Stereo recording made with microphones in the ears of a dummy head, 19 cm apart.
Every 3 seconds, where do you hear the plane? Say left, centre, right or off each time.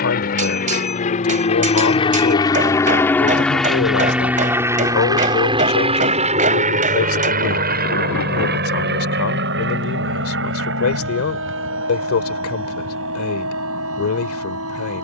left, centre, right, right, right.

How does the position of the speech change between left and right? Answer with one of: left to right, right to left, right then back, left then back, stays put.
stays put.